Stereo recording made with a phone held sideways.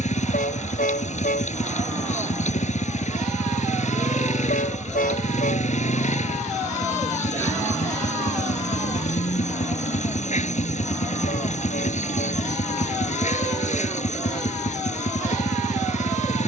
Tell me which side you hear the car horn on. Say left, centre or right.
left.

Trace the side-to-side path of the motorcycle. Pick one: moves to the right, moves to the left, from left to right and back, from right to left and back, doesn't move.
doesn't move.